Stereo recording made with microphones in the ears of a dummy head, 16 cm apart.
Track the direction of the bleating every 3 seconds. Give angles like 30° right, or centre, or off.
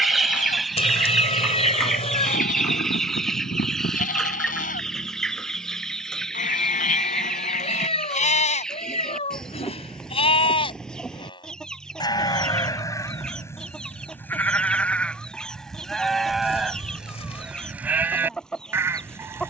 50° left, 50° left, 50° left, 30° left, 20° left, centre, 10° right.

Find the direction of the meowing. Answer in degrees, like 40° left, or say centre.
40° left.